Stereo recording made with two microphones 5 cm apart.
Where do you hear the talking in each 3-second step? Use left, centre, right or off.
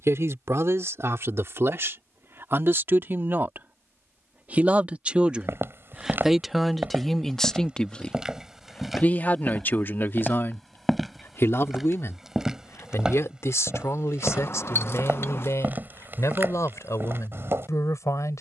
right, right, centre, left, left, left.